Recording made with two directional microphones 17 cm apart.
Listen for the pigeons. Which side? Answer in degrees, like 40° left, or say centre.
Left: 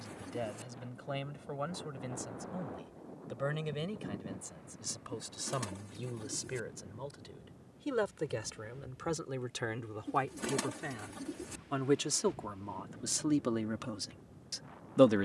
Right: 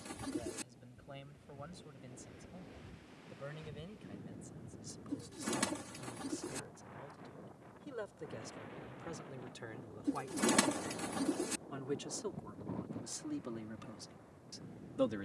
40° right.